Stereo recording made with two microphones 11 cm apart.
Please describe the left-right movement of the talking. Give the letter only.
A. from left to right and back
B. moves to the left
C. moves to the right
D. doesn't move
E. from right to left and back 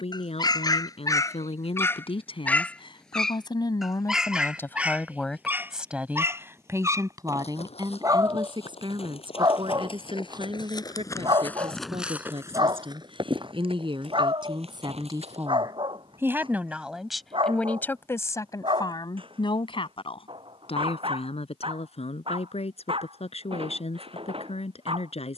A.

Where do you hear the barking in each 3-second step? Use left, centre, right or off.
left, centre, right, right, right, right, right, right, right.